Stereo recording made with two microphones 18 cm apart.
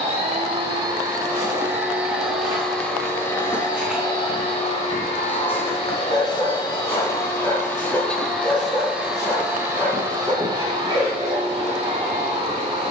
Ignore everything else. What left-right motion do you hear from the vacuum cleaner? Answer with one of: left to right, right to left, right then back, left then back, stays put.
left then back.